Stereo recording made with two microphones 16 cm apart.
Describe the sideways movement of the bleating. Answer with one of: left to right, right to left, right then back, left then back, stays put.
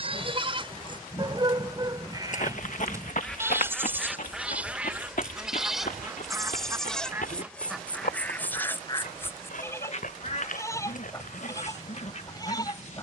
right to left.